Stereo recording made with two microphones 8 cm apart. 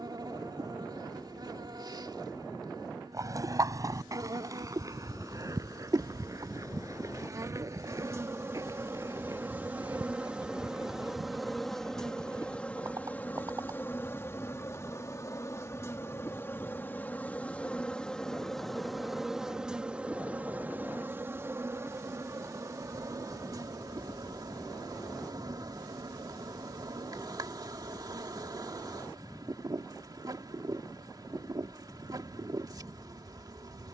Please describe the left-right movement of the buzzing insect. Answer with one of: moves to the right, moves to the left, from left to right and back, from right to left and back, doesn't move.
from right to left and back.